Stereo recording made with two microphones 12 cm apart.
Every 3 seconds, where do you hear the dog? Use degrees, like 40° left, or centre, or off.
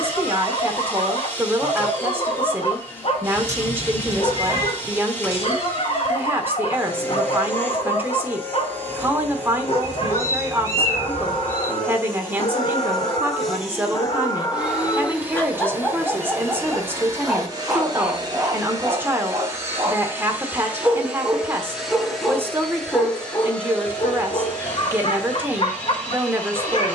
60° left, 60° left, 60° left, 60° left, 40° left, centre, 20° right, 10° left, 50° left.